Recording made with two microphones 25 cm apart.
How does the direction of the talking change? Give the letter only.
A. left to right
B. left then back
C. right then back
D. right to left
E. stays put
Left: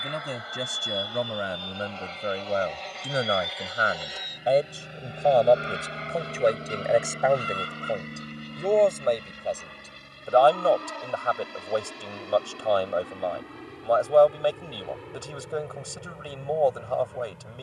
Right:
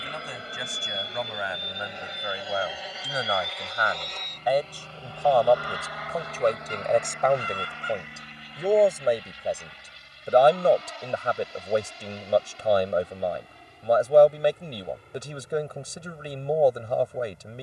A.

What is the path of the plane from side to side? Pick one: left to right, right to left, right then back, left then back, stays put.
right to left.